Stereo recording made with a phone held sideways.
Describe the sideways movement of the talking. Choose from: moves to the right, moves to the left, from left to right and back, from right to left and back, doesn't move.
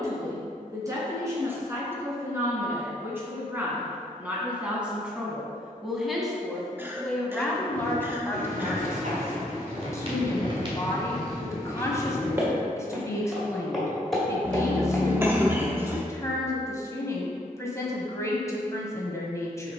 moves to the left.